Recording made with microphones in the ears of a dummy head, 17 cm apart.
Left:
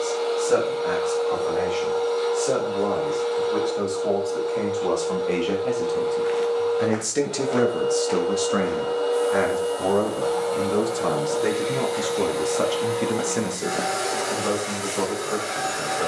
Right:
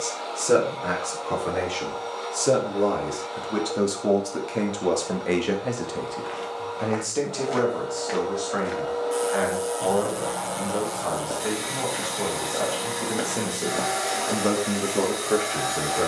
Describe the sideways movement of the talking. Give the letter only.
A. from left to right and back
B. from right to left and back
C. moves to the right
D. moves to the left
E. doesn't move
B.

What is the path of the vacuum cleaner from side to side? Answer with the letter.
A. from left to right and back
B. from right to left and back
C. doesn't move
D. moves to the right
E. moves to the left
C.